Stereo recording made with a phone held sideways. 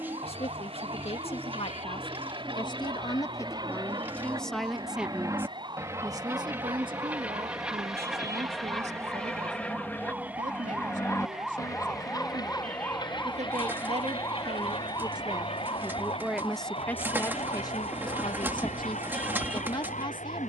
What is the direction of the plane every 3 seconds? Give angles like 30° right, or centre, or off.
40° right, 30° right, 10° right, 10° left, 30° left, 50° left, 60° left.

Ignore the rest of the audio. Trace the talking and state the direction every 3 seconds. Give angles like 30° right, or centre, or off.
40° left, 10° left, 40° right, 60° right, 50° right, centre, 40° left.